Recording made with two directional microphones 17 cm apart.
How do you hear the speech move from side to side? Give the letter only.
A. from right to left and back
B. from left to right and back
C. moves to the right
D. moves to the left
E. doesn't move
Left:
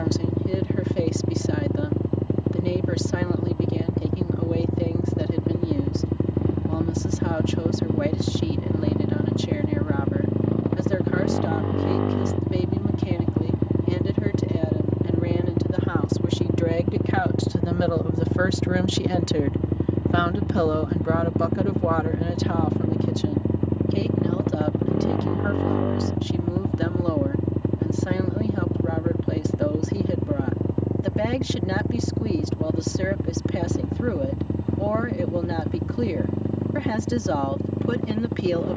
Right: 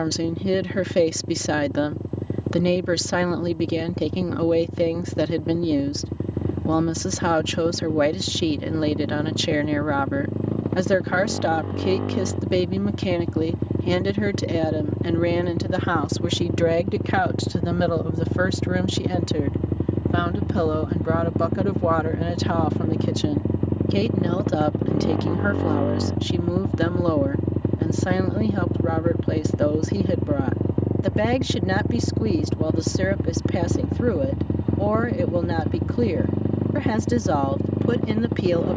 A.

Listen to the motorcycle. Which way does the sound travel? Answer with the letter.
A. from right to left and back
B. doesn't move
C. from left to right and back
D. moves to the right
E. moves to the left
D.